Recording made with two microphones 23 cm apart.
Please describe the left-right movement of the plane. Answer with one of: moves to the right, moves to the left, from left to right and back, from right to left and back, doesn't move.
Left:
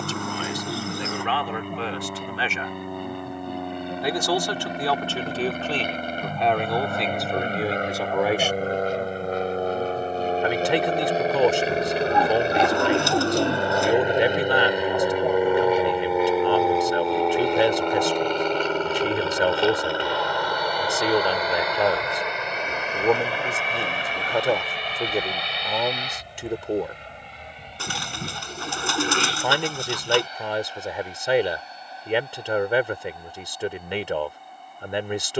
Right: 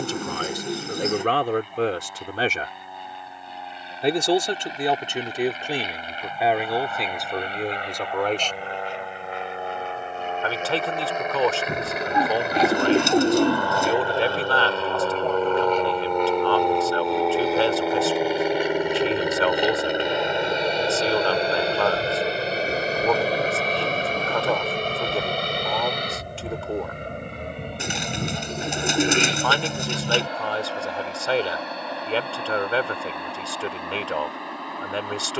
moves to the right.